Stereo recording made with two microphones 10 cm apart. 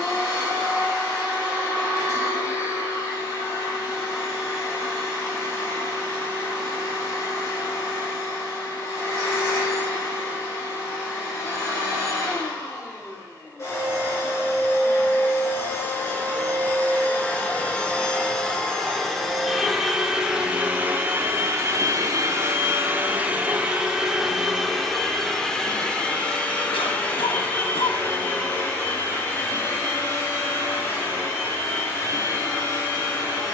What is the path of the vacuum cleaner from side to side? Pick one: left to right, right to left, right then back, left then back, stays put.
right then back.